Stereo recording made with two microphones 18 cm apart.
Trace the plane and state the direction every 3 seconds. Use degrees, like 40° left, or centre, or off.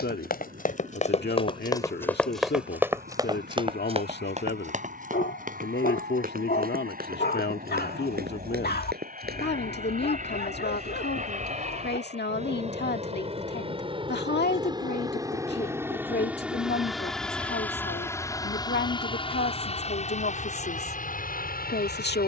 60° right, 60° right, 60° right, 50° right, 30° right, 10° right, 30° left, 50° left.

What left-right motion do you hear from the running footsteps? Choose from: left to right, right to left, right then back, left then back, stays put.
left to right.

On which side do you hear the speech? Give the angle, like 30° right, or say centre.
70° left.